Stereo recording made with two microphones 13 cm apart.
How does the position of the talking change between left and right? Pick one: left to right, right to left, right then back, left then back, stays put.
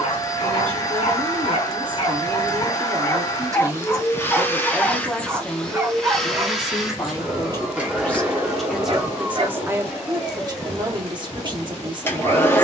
left then back.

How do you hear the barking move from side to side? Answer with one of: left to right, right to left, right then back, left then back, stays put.
left to right.